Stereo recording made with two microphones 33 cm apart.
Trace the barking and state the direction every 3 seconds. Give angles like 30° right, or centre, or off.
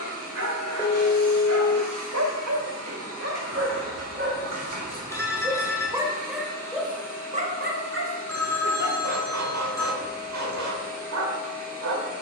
60° right, 30° right, 20° right, 60° right.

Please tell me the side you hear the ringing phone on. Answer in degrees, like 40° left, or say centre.
10° left.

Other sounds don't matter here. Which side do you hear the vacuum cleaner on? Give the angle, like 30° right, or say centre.
50° right.